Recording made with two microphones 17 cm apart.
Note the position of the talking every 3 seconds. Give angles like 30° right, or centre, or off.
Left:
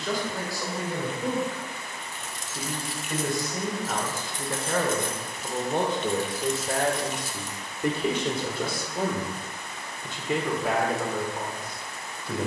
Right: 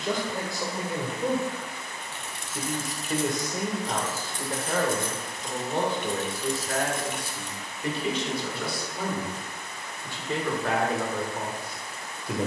20° right, centre, 40° left, 10° left.